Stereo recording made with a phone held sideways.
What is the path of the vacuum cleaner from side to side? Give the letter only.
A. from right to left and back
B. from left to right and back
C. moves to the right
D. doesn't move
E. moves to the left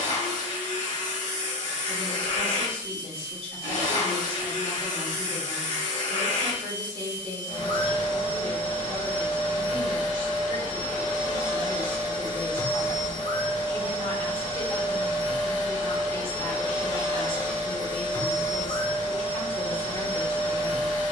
D.